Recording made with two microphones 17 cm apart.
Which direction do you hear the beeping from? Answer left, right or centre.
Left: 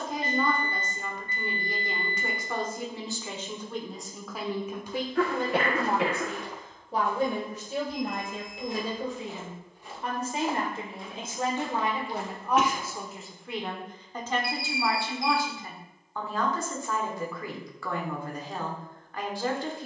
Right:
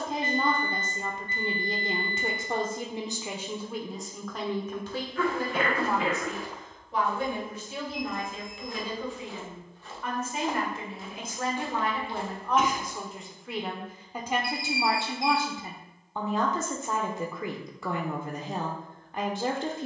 right.